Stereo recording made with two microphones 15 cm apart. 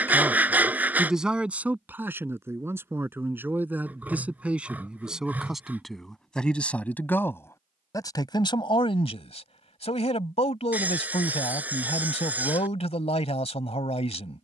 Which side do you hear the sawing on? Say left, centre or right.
centre.